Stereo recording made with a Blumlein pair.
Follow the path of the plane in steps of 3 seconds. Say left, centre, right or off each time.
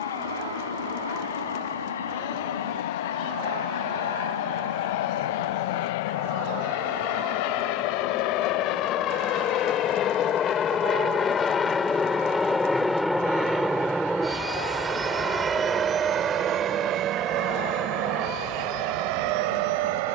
left, left, left, left, centre, right, right.